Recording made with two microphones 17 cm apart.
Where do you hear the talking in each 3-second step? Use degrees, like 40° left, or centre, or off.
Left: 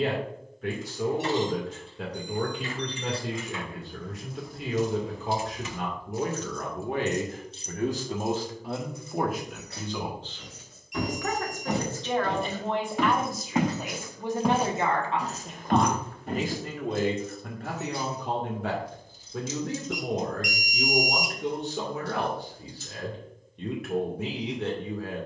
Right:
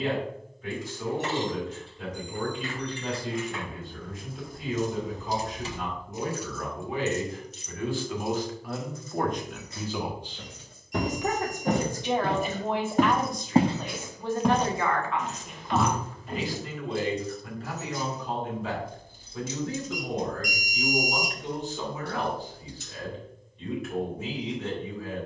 70° left, 70° left, 50° left, 10° right, 10° left, 50° left, 70° left, 70° left, 70° left.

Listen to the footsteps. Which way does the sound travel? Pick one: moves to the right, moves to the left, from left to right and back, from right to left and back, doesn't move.
moves to the left.